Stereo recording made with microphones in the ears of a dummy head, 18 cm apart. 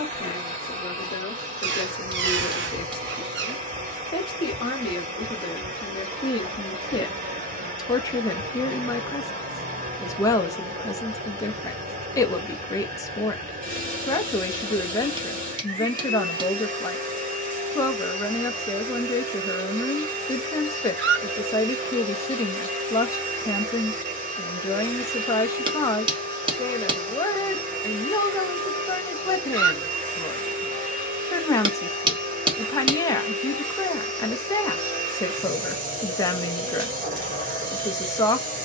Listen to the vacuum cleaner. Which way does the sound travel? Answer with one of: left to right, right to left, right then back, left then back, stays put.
stays put.